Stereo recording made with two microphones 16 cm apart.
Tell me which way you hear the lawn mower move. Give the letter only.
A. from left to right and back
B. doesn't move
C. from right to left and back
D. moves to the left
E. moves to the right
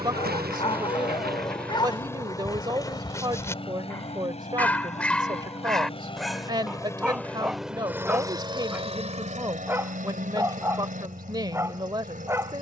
C.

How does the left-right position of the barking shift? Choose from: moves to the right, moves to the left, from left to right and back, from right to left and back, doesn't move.
moves to the right.